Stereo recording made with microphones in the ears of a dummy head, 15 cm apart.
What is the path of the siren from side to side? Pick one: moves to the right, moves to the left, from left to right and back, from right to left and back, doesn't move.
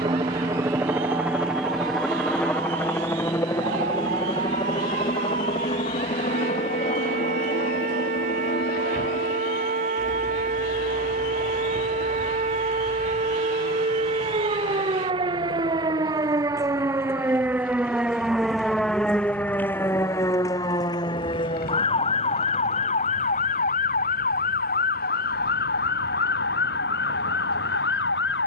moves to the left.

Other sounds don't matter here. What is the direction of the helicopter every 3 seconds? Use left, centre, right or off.
centre, left, left, left, left, left, left, left, left, left.